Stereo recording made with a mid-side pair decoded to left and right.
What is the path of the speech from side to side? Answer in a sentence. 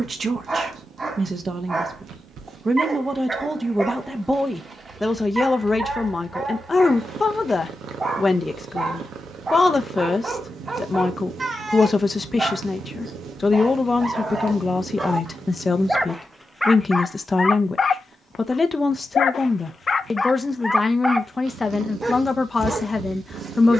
In this clip you hear the speech go from the right side to the left.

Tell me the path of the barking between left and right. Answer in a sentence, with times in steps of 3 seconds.
You can hear the barking on the right from 0 s, in the centre from 15 s, on the left from 18 s and on the right from 21 s.